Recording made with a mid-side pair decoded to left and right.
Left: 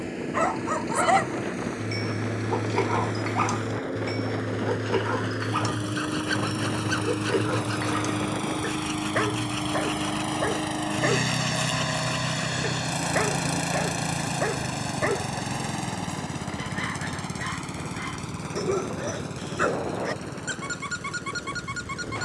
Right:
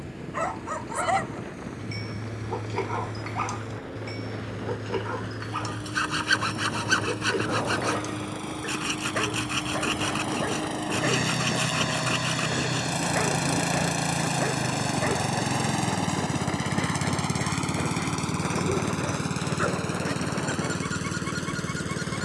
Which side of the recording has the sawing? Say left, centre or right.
right.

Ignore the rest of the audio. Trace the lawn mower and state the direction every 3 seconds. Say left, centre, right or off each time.
left, left, left, left, centre, right, right, right.